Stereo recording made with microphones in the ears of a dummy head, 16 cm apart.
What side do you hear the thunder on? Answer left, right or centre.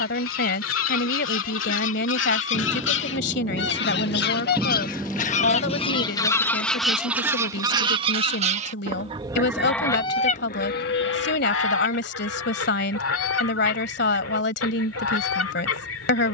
centre.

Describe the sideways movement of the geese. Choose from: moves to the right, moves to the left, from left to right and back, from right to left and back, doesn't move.
from left to right and back.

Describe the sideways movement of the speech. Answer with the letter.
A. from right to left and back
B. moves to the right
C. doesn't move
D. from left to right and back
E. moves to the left
C.